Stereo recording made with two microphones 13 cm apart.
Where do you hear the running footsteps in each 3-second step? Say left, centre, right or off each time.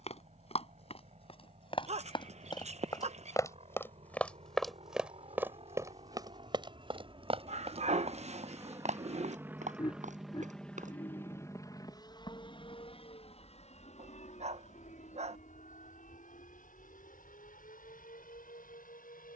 left, centre, right, right, off, off, off.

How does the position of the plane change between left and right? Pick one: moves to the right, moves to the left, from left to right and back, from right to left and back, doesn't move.
moves to the left.